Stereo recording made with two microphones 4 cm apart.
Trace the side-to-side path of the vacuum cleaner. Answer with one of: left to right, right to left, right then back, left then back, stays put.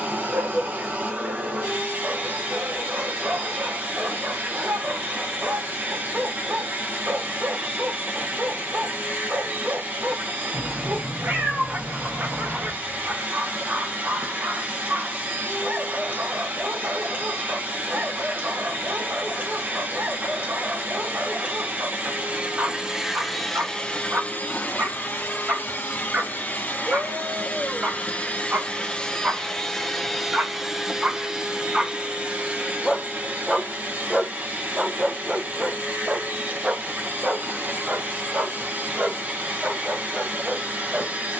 left then back.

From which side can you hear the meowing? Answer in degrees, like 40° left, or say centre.
60° right.